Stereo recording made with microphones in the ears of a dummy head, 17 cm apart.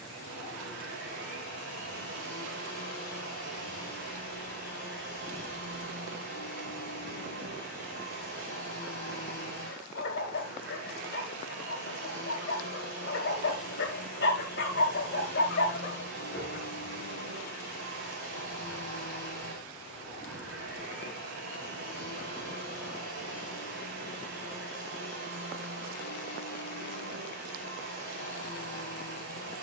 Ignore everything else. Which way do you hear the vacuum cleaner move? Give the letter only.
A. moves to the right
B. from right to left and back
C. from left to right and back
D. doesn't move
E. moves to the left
D.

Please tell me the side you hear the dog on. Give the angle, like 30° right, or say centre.
60° left.